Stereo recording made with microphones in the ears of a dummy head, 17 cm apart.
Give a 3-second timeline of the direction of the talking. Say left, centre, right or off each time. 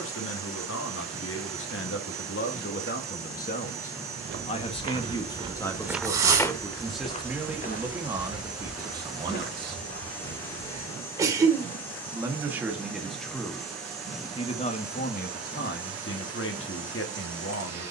left, left, centre, right, centre, left.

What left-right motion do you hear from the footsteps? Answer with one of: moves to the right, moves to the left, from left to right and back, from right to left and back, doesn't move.
moves to the left.